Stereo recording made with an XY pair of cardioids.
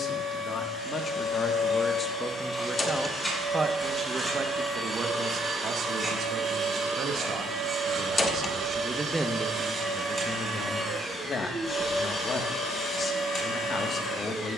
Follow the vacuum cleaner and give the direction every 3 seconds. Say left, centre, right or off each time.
left, centre, right, centre, left.